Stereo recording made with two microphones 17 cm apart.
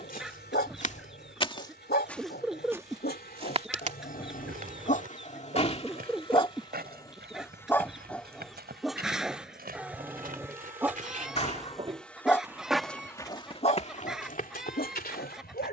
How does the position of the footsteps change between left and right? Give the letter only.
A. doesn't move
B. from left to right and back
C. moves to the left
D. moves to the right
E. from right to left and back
B.